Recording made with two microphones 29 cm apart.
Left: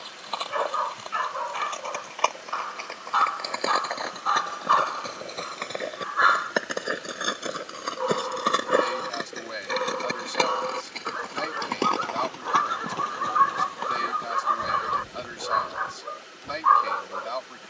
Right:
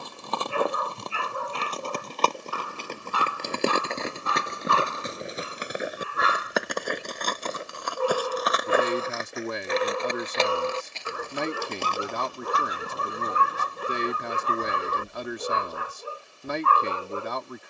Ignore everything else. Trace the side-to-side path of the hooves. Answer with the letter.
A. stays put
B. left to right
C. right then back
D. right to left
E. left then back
D.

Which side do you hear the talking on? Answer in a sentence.
In this clip you hear the talking on the right.